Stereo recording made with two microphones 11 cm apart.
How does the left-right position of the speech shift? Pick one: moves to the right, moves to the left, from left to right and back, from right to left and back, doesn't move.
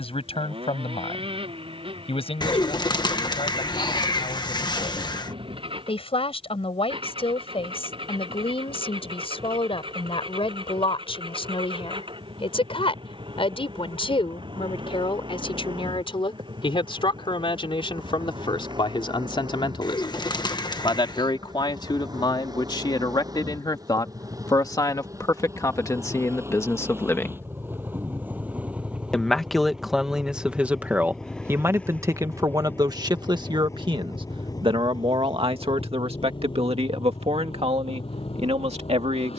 moves to the right.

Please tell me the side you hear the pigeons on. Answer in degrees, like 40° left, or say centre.
40° left.